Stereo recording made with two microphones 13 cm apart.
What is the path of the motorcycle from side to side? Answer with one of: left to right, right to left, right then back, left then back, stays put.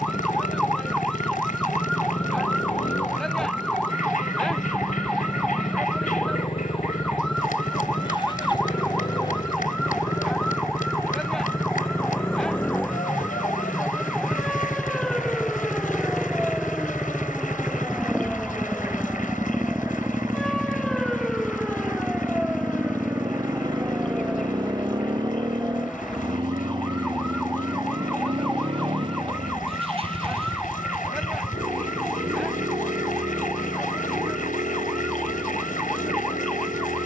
left to right.